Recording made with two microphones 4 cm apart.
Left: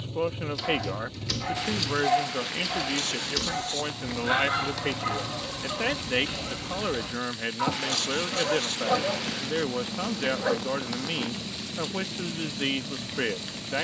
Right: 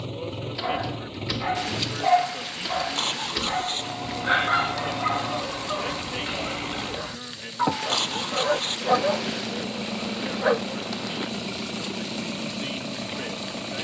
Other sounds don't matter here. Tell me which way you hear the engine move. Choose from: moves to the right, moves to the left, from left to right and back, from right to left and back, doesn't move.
doesn't move.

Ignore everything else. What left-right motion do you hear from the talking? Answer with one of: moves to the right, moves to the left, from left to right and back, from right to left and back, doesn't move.
doesn't move.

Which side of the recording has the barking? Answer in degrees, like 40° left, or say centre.
20° right.